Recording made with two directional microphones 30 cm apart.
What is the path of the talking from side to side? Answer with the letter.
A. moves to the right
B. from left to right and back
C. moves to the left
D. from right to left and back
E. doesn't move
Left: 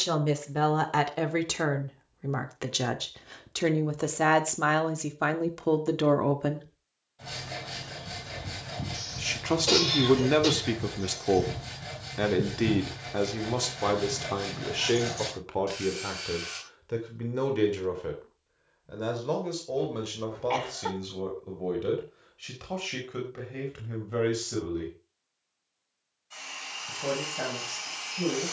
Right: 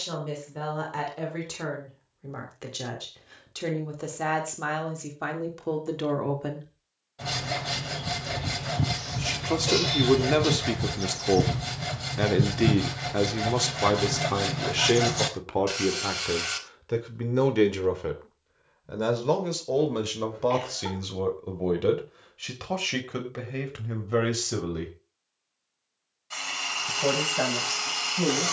A.